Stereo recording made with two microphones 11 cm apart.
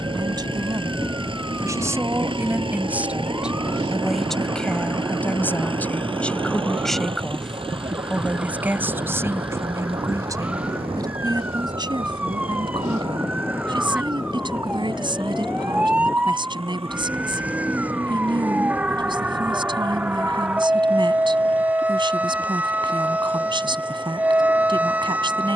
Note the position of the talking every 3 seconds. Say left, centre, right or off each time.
right, centre, centre, right, right, right, right, right, right.